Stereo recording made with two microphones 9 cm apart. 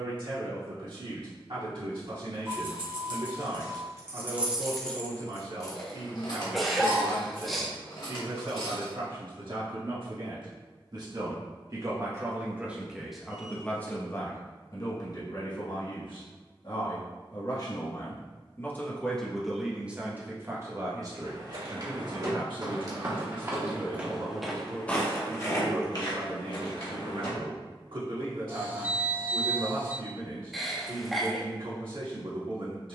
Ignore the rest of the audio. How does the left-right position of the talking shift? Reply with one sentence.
In this clip you hear the talking go left and come back.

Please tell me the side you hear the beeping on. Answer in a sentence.
In this clip you hear the beeping on the right.